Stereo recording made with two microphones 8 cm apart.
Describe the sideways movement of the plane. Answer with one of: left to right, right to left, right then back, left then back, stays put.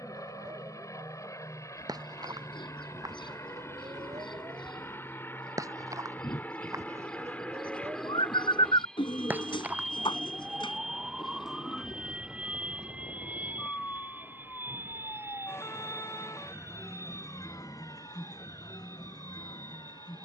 left to right.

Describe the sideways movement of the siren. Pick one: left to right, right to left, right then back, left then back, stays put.
right to left.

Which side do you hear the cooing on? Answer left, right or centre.
left.